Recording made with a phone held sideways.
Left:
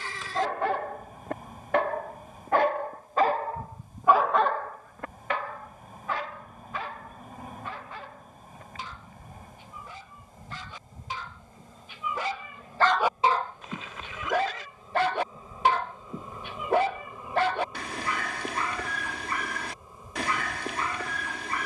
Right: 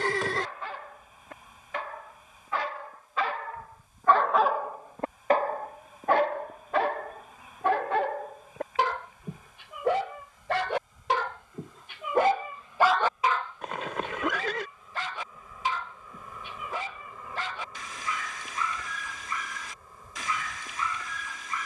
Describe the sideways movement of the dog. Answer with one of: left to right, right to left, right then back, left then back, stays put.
right then back.